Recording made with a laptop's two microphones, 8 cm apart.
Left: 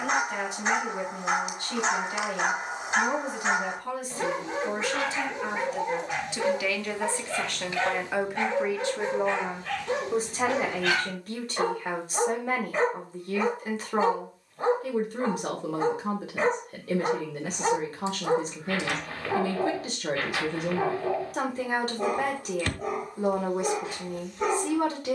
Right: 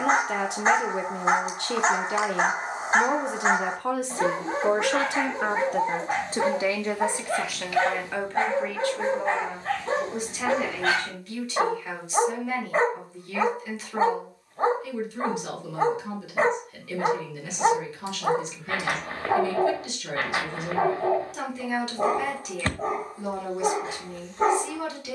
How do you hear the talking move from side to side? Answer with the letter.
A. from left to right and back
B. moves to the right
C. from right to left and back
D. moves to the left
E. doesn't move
D.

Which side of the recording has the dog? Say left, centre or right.
right.